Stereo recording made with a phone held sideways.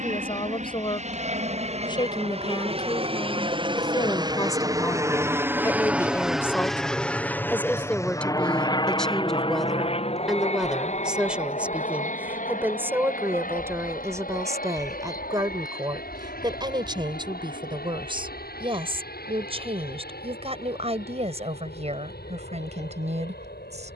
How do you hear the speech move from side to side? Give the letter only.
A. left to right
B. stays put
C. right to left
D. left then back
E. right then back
A.